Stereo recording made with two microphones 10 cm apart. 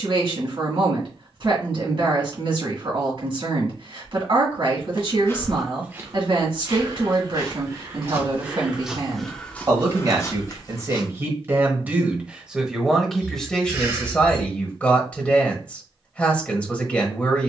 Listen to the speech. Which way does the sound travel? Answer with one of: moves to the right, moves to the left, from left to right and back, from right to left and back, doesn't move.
moves to the left.